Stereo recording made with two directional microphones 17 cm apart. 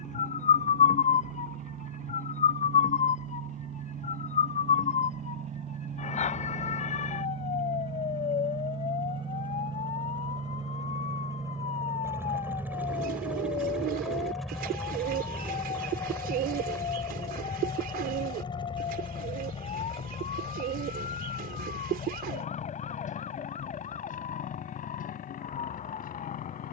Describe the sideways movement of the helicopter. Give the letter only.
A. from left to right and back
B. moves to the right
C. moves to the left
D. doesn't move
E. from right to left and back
C.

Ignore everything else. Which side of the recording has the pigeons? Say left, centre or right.
right.